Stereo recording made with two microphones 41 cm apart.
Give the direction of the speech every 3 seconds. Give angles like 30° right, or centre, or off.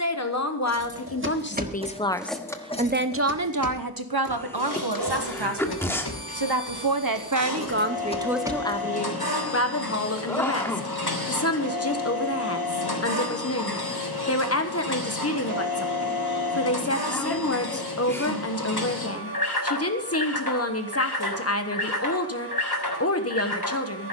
20° left, 60° right, 30° right, 30° left, 40° left, 40° left, 40° left, 40° left.